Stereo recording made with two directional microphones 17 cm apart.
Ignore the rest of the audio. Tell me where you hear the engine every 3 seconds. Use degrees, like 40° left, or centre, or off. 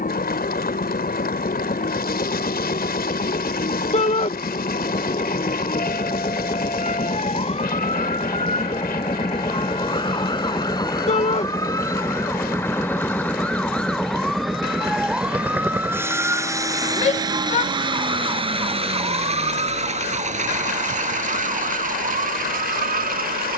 50° left, 50° left, 40° left, 20° left, 10° left, 20° right, 40° right, 50° right.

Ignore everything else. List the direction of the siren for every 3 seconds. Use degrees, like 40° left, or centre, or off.
50° left, 50° left, 40° left, 30° left, 10° left, 10° right, 30° right, 50° right.